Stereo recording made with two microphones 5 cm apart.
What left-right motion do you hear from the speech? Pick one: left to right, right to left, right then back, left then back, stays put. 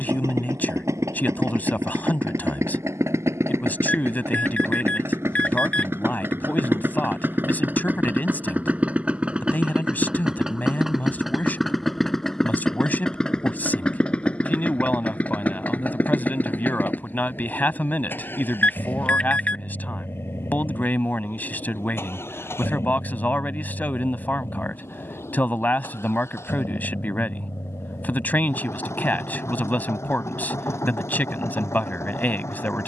stays put.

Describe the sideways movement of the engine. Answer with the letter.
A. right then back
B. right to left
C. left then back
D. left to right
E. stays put
B.